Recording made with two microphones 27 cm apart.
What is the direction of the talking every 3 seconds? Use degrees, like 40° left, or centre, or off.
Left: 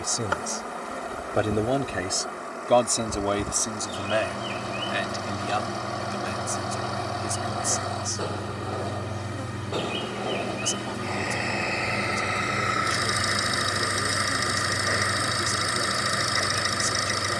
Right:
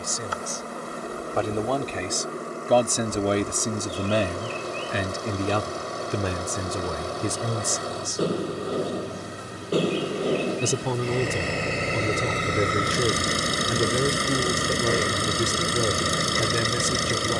10° left, 40° right, 70° right, 80° right, 80° right, 80° right.